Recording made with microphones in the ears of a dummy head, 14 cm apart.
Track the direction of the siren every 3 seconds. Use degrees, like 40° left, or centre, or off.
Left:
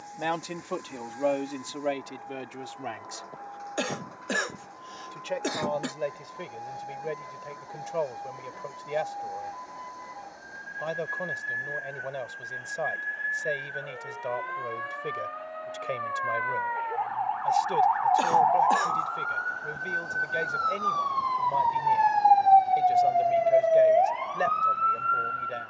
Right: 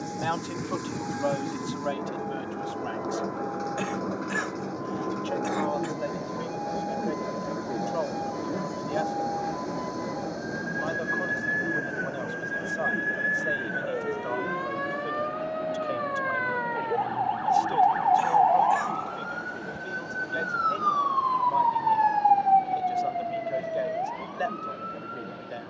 70° right, 60° right, 60° right, 60° right, 50° right, 40° right, 10° right, 40° left, 70° left.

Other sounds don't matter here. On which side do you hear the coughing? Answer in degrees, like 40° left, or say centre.
40° left.